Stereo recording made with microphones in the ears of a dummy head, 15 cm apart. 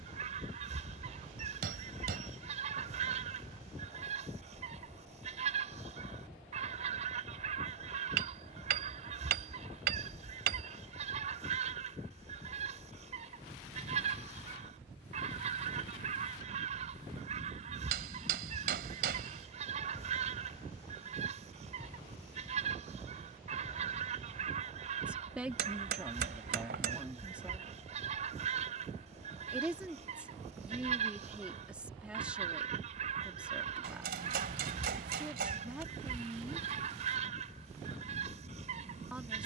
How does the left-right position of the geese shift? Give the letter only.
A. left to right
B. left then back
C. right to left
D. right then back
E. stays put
E.